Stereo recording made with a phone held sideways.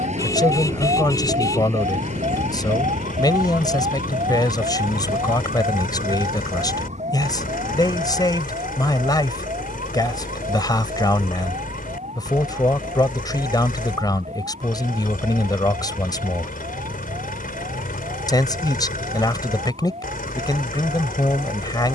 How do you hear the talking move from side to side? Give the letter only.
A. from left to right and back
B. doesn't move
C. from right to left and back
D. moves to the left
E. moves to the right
B.